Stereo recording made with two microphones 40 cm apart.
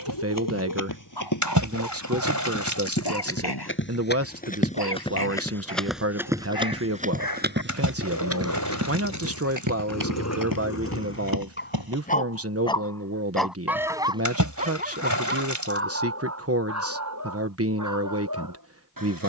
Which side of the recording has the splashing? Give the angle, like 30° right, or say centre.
50° right.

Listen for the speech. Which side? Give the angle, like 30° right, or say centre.
40° right.